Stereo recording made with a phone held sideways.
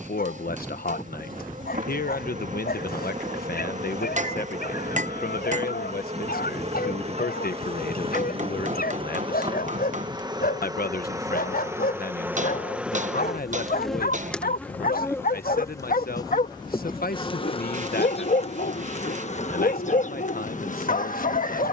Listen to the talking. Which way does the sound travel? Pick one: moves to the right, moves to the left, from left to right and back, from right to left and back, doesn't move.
doesn't move.